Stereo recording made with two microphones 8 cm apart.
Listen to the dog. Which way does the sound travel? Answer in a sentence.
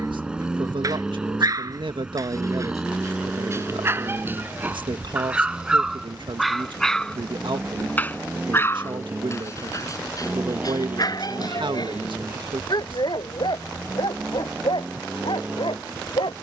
You can hear the dog travel towards the left.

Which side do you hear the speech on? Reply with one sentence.
You can hear the speech on the right.